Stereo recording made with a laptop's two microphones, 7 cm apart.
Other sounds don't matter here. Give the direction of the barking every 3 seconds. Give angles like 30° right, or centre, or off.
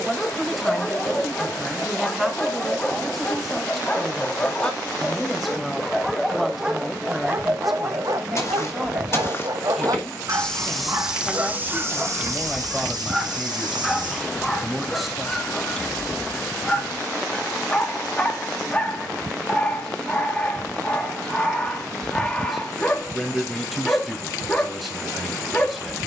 20° left, 20° left, 30° right, 40° right, centre, 20° left, 20° left, 20° left, 20° left.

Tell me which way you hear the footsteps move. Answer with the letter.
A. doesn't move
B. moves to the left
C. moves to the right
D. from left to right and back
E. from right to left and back
C.